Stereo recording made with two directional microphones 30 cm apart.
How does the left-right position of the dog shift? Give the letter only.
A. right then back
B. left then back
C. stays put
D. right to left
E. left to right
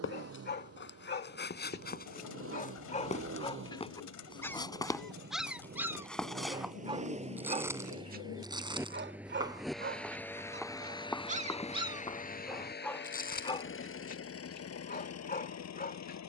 A.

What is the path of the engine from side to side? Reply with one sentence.
In this clip you hear the engine move from right to left.